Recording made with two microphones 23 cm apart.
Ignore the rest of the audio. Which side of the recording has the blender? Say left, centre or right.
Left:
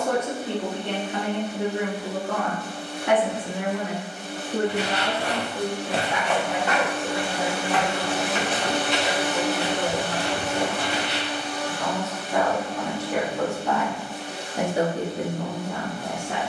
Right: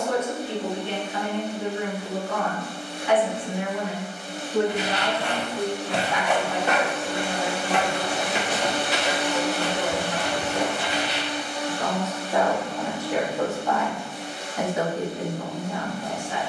left.